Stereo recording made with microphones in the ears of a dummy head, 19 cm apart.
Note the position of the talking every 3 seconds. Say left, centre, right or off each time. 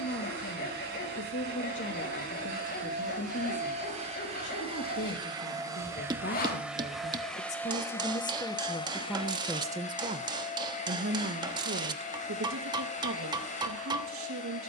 left, left, left, right, right.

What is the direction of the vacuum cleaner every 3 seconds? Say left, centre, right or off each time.
right, right, centre, left, left.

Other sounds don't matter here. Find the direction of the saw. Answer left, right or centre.
left.